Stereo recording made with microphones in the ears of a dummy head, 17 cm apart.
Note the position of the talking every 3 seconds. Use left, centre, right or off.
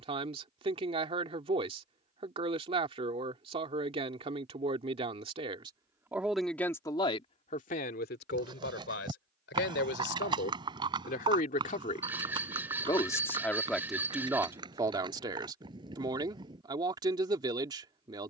right, right, left, left, centre, right.